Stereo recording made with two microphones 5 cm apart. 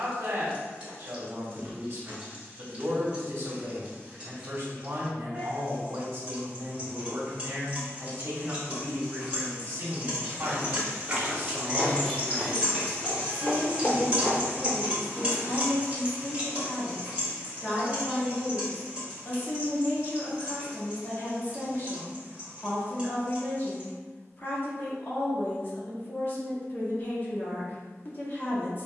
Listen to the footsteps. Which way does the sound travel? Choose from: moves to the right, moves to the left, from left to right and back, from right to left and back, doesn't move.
from right to left and back.